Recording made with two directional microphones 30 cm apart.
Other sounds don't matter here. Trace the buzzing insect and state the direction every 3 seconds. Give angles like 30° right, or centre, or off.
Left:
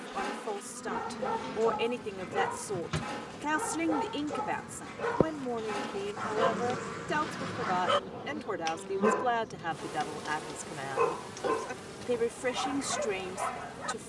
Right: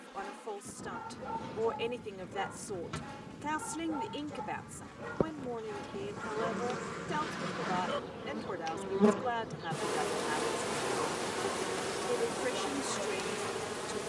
50° left, 40° left, centre, 40° right, 60° right.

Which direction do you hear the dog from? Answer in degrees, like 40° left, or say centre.
70° left.